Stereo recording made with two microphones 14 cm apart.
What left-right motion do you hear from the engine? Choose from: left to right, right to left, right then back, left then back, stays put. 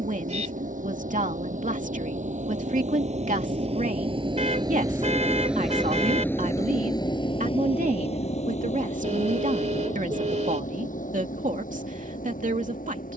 right to left.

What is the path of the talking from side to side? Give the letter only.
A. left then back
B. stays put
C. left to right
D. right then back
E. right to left
B.